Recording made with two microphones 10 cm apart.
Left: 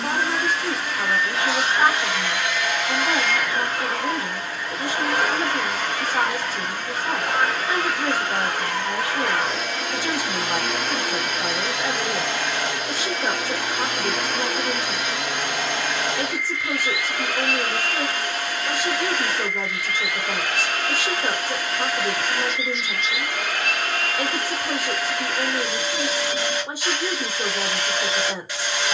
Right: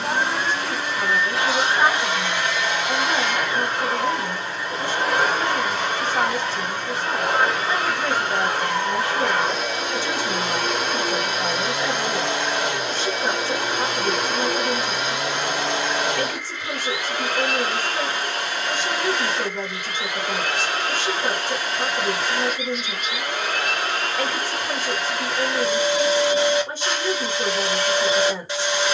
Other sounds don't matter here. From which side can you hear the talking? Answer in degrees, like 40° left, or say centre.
10° left.